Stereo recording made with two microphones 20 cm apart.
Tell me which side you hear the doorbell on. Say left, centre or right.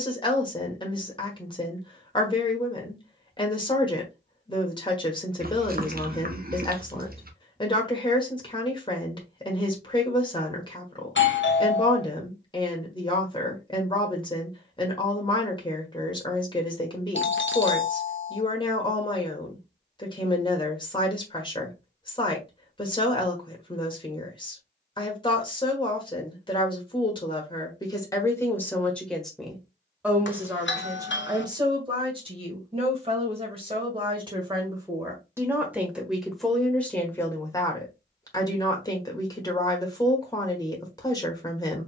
left.